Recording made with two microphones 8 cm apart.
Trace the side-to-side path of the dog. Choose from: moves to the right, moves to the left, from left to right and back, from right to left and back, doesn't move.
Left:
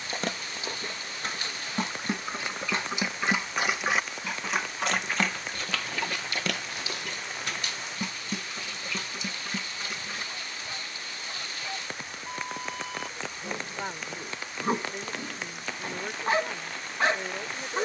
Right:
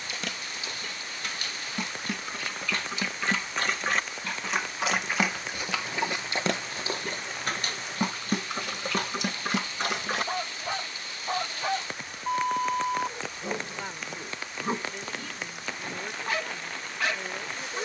from left to right and back.